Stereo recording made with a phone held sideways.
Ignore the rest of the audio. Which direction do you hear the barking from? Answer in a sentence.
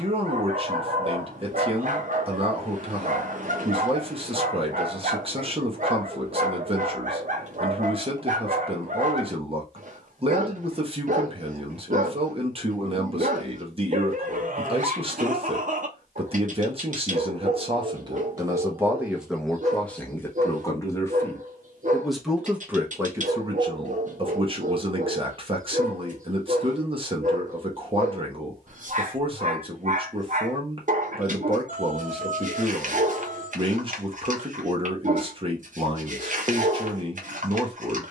You can hear the barking on the right.